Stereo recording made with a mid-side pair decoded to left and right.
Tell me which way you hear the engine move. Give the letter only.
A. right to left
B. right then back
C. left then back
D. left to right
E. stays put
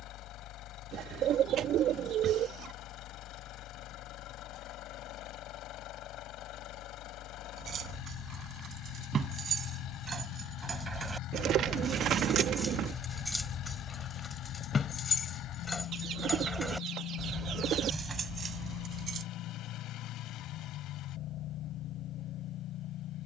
E.